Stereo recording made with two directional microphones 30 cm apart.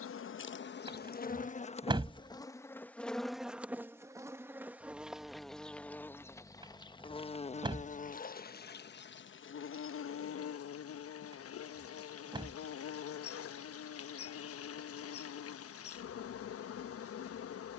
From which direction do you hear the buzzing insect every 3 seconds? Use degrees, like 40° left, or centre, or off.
30° left, centre, 20° left, 50° left, 50° left, 50° left.